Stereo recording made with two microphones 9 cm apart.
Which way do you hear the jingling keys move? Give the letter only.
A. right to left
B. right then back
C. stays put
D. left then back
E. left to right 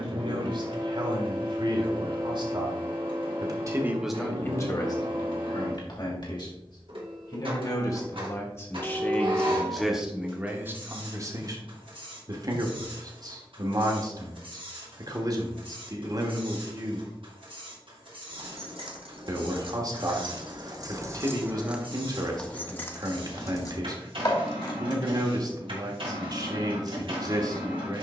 A.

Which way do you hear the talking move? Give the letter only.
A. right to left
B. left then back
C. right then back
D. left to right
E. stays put
B.